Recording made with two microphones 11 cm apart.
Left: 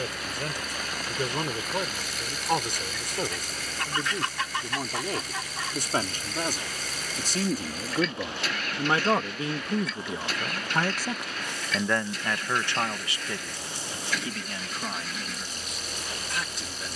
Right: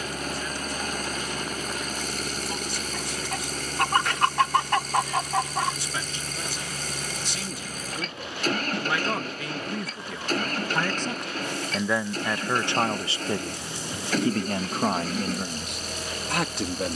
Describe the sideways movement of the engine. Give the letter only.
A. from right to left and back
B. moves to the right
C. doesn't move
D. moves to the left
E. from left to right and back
C.